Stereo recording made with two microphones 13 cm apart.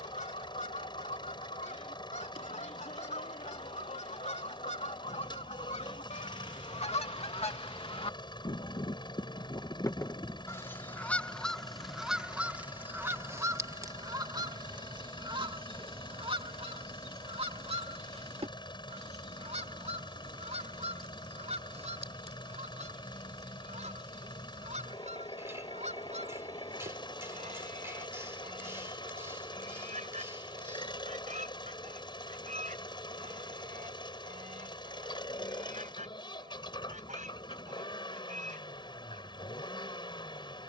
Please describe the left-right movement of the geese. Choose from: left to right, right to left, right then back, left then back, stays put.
left to right.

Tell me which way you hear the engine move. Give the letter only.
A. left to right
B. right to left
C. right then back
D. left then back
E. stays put
E.